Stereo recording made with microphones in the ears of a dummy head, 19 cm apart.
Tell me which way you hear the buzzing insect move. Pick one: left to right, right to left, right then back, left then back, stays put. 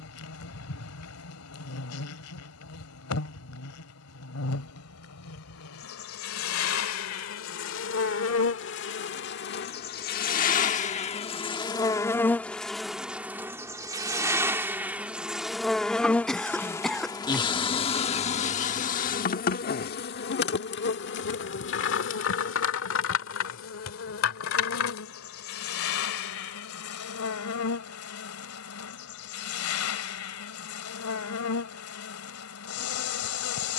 right then back.